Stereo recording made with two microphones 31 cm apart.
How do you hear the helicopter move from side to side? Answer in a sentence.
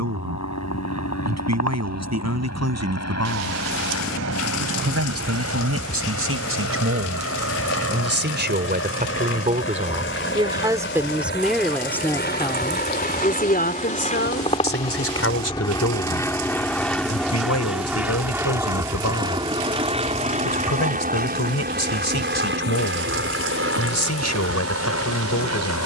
In this clip you hear the helicopter move from left to right.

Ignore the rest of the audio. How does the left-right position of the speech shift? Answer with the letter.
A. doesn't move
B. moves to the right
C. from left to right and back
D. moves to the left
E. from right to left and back
D.